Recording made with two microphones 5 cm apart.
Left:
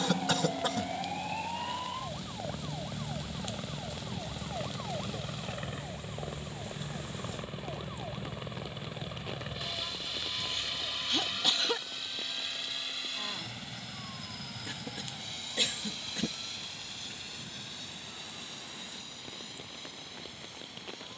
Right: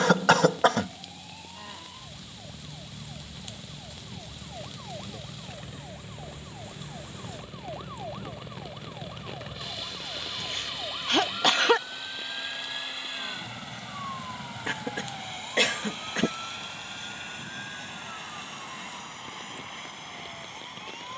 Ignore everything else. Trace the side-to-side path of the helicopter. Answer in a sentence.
In this clip you hear the helicopter move to the right.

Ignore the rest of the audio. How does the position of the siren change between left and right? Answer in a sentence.
In this clip you hear the siren go from the left side to the right.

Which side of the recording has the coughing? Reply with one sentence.
You can hear the coughing on the right.